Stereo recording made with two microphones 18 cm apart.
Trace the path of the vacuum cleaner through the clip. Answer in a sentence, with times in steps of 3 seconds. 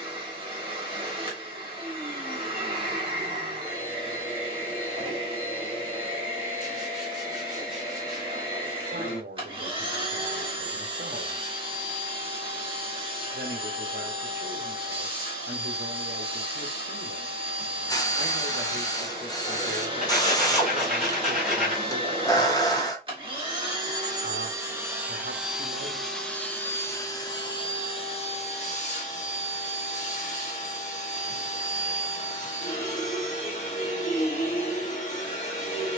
In this clip you hear the vacuum cleaner on the right from 0 s, in the centre from 24 s and on the left from 27 s.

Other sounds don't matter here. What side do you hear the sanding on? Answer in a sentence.
You can hear the sanding in the centre.